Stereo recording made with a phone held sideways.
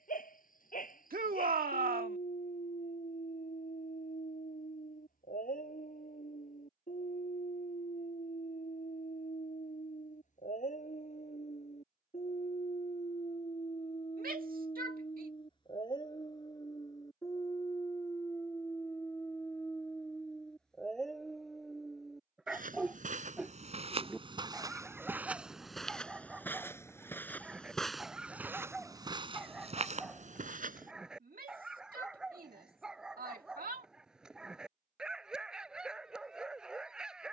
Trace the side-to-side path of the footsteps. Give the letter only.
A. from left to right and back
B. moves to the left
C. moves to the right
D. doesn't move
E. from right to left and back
E.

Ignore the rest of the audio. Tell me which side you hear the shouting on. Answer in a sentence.
You can hear the shouting on the right.